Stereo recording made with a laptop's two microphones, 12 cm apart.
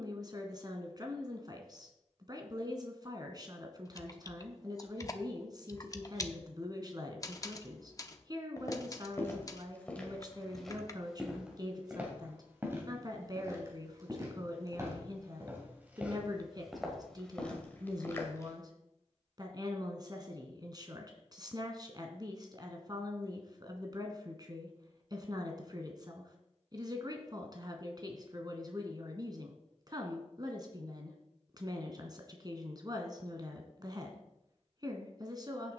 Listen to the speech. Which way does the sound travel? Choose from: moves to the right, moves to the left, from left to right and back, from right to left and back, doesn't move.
doesn't move.